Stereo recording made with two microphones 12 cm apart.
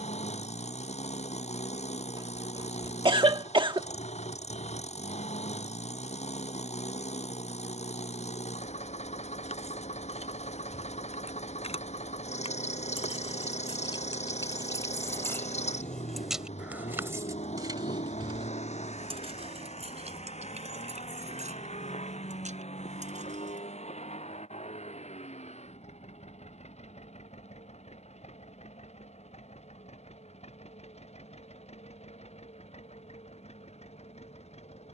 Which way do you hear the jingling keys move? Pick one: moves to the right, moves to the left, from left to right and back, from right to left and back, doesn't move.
moves to the right.